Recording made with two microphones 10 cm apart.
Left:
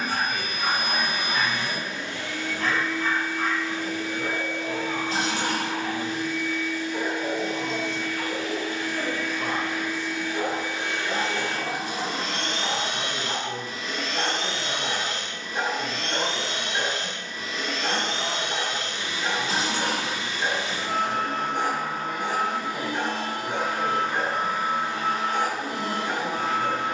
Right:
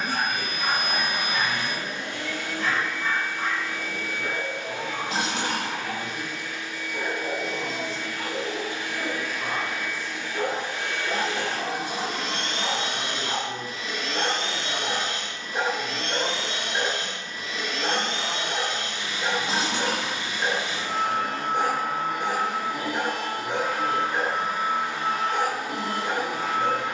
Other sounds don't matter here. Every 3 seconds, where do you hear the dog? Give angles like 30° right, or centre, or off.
50° left, 50° left, 40° left, centre, 20° right, 20° right, 20° right, 20° right, 20° right.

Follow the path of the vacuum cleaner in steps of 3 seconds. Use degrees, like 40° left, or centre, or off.
50° right, 50° right, 40° right, 10° left, 40° left, 40° left, 40° left, 40° left, 40° left.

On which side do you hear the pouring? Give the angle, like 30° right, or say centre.
20° right.